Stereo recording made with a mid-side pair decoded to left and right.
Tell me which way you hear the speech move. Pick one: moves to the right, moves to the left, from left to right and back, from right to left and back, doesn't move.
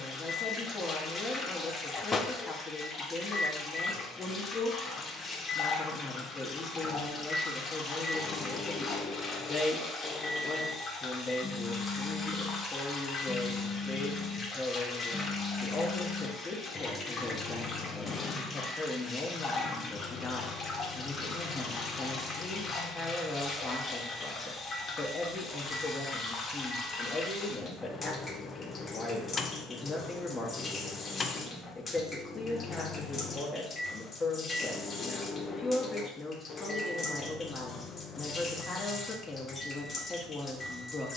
doesn't move.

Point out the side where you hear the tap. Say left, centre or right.
left.